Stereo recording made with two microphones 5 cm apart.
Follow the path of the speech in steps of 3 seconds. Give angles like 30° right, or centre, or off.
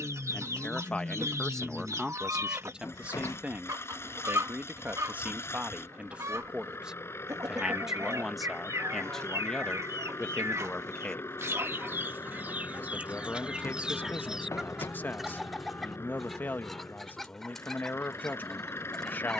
centre, 30° right, 10° right, 20° left, 30° left, 30° left, 30° left.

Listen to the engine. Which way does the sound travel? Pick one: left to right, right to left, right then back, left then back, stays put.
stays put.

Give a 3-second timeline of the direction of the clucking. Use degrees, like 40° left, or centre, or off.
70° right, 70° right, 70° right, 60° right, 20° right, centre, 10° left.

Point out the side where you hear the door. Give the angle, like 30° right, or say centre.
70° left.